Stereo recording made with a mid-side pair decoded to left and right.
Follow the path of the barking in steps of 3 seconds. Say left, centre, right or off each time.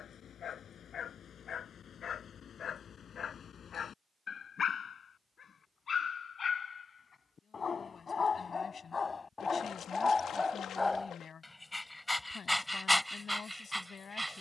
left, left, left, left, centre.